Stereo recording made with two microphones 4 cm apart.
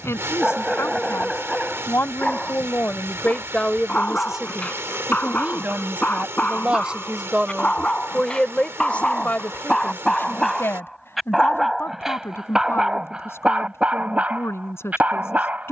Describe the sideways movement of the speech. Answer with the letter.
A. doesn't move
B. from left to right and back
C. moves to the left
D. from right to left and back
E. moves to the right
B.